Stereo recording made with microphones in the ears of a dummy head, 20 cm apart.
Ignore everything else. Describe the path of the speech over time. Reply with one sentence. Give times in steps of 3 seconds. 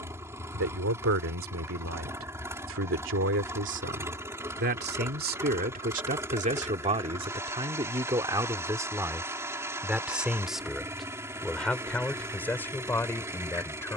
In this clip you hear the speech on the right from 0 s and in the centre from 9 s.